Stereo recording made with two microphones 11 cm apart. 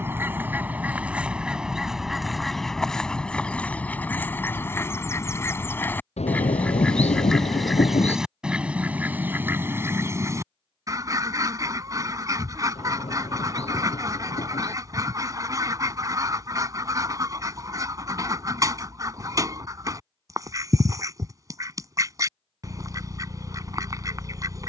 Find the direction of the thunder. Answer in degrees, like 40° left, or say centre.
90° left.